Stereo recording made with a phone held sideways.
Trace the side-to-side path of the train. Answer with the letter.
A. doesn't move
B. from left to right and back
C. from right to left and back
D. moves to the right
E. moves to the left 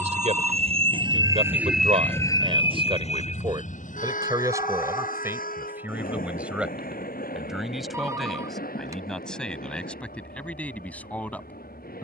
E.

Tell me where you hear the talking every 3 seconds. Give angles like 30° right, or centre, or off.
50° right, 20° right, centre, 10° left.